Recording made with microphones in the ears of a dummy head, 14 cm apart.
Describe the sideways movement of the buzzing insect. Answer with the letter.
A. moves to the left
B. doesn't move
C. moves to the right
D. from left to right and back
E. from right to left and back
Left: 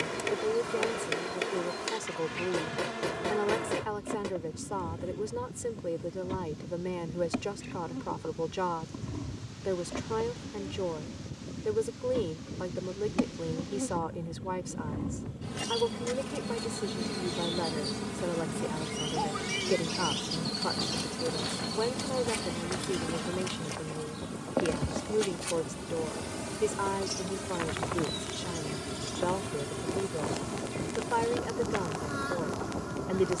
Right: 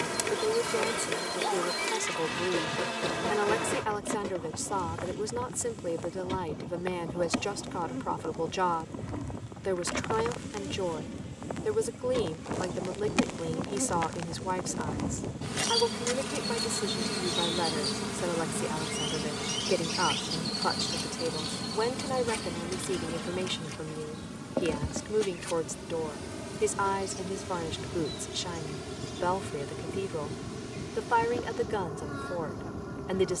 A.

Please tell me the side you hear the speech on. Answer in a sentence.
You can hear the speech on the right.